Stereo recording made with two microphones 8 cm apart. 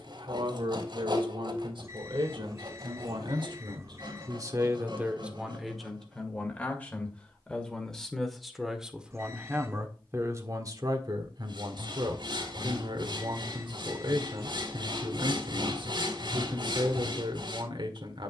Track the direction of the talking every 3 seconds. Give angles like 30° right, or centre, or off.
70° right, 40° right, 10° left, 40° right, 70° right, 70° right.